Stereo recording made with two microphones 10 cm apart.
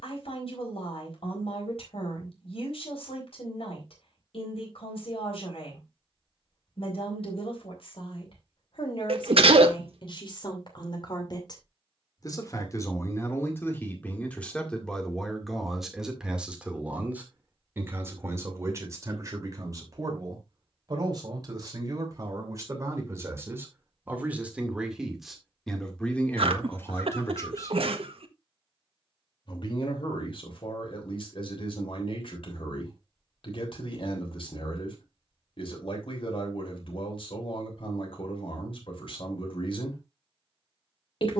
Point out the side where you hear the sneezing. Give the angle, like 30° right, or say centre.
70° right.